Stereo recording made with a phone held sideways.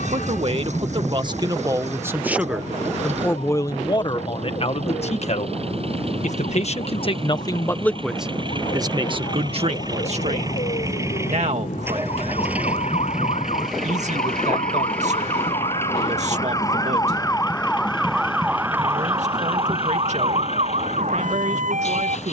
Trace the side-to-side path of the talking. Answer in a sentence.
In this clip you hear the talking go left and come back.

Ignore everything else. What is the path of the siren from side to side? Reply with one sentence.
In this clip you hear the siren go from the left side to the right.